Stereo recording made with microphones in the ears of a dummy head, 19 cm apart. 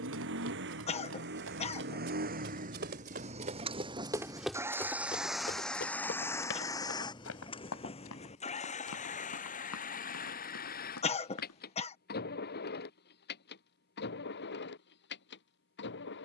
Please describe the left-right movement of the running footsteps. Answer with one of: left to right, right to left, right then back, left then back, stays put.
right to left.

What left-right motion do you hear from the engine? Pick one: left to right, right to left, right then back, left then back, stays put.
right to left.